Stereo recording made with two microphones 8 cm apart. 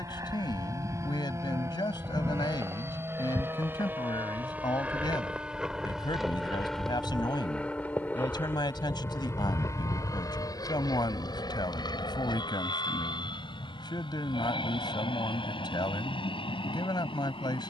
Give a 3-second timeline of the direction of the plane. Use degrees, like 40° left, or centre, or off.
40° right, 20° right, 10° left, 40° left, 60° left, 70° left.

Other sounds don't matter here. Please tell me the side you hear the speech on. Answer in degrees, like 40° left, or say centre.
60° left.